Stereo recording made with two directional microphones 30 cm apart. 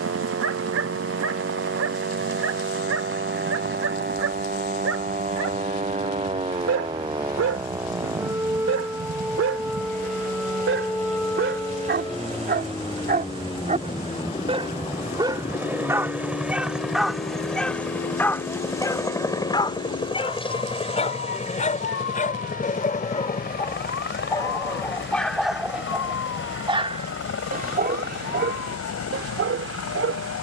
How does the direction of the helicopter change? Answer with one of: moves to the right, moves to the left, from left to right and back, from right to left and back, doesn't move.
moves to the left.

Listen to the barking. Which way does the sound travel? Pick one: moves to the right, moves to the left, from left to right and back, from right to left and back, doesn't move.
from right to left and back.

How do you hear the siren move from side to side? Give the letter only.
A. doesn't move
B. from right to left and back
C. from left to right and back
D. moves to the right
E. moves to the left
E.